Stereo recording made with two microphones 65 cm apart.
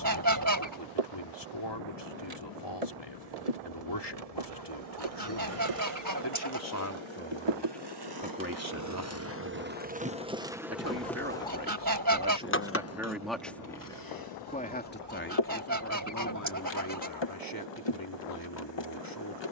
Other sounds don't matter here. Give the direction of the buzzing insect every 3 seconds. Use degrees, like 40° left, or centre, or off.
70° right, 60° right, 40° right, 10° right, 30° left, 40° left, 40° left.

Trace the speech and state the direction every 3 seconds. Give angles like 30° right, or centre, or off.
40° left, 40° left, 10° left, 20° right, centre, 30° left, 30° left.